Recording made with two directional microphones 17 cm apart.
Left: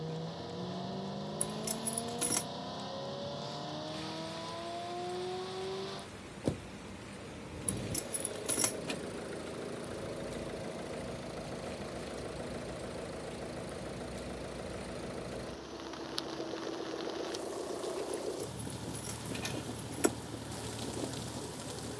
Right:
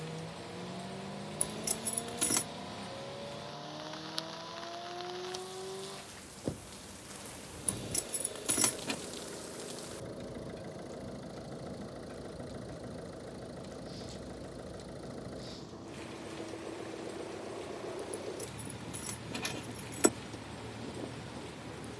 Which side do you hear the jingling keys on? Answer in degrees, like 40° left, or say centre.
20° right.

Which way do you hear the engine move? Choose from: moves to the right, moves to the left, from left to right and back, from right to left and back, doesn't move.
doesn't move.